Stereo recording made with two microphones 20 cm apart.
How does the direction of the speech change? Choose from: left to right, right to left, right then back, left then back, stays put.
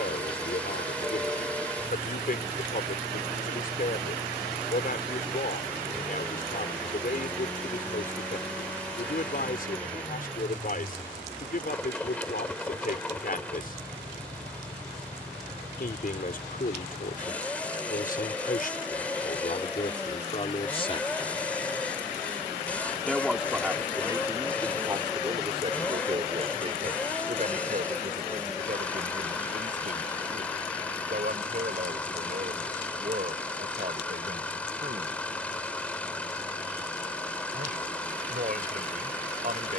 left to right.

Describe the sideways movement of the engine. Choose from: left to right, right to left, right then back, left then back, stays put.
stays put.